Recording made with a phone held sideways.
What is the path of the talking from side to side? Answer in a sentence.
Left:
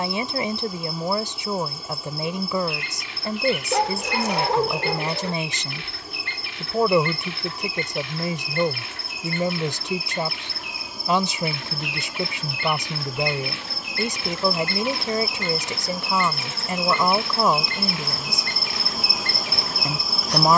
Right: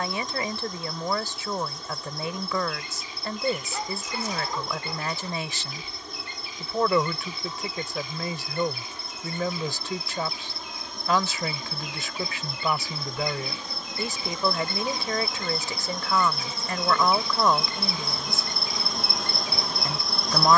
In this clip you hear the talking stay in one place.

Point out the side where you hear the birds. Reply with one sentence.
You can hear the birds on the left.